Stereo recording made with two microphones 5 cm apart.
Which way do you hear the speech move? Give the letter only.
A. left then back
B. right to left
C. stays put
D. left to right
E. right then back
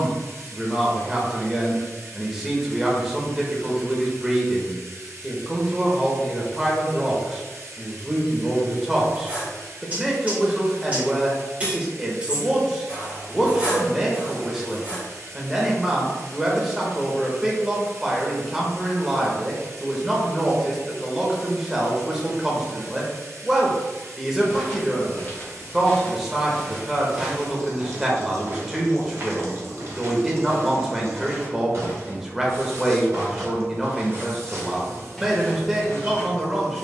C.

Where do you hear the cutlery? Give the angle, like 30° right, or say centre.
20° right.